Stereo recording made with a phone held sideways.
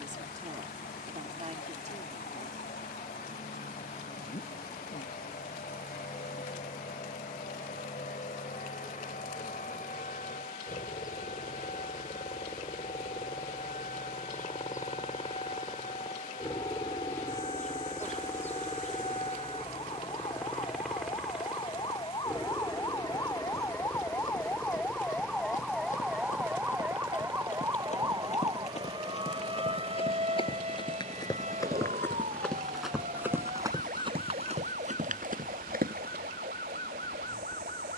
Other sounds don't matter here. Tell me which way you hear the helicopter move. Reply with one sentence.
In this clip you hear the helicopter travel towards the right.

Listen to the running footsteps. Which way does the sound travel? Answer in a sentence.
You can hear the running footsteps move to the right.